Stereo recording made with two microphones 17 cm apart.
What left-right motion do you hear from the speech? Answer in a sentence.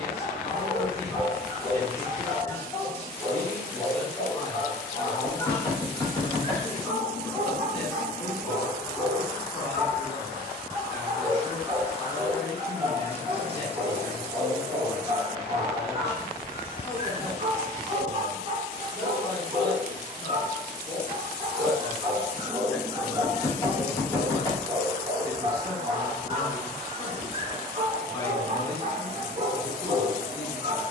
In this clip you hear the speech stay in one place.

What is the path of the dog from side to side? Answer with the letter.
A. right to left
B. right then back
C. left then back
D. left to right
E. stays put
D.